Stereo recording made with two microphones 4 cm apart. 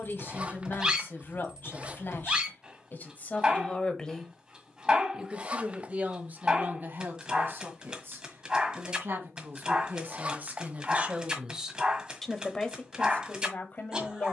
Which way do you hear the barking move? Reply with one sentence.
In this clip you hear the barking stay put.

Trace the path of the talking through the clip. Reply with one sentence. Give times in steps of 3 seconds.
In this clip you hear the talking on the left from 0 s, in the centre from 3 s, on the right from 6 s and on the left from 12 s.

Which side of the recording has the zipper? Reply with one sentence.
In this clip you hear the zipper on the right.